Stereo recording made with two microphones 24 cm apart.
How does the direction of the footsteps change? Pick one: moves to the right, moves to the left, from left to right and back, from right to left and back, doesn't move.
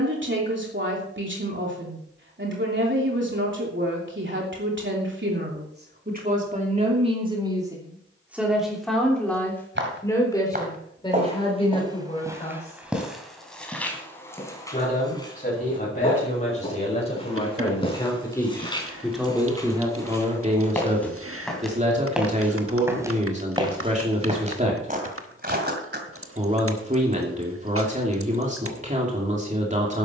from right to left and back.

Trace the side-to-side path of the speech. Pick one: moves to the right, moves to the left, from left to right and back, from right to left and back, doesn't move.
from right to left and back.